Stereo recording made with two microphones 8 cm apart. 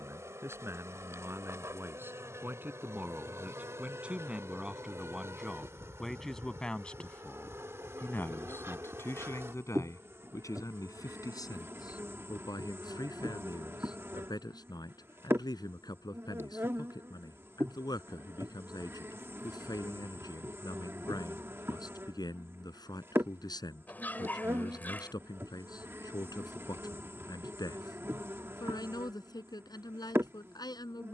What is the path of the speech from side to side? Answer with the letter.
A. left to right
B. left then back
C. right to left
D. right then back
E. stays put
C.